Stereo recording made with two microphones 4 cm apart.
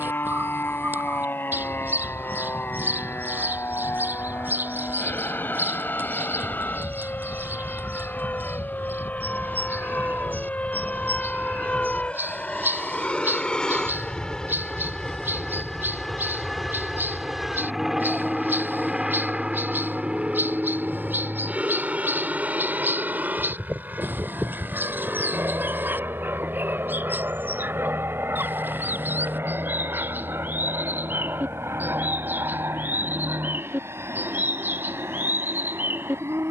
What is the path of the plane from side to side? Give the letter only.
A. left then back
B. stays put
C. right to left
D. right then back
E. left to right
E.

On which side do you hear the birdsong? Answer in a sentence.
In this clip you hear the birdsong on the right.